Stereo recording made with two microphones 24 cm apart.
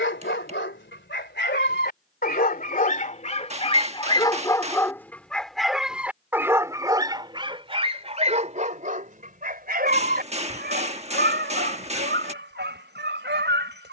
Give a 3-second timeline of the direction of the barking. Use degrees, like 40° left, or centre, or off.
40° left, 10° left, 20° right, 40° right, 50° right.